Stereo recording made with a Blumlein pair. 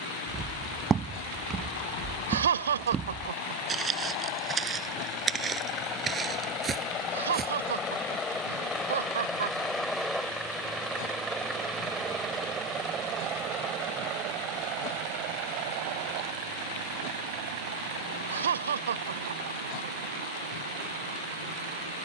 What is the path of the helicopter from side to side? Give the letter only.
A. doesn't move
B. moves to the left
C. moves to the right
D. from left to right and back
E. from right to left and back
C.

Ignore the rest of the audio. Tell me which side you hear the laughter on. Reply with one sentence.
You can hear the laughter on the right.